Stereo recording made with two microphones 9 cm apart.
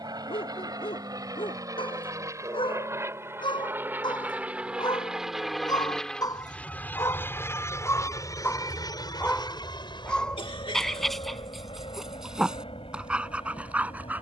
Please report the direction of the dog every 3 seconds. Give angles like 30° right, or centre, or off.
70° left, 50° left, 30° left, 10° left, 10° right.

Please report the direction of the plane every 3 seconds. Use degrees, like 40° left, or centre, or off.
40° right, 10° right, 30° left, 50° left, 70° left.